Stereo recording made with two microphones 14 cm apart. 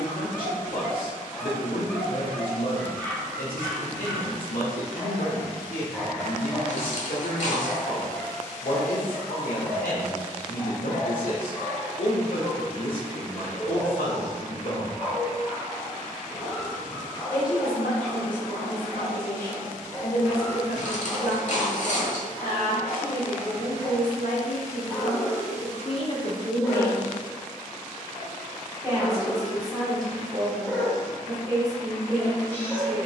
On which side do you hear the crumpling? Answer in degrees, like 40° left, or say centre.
60° left.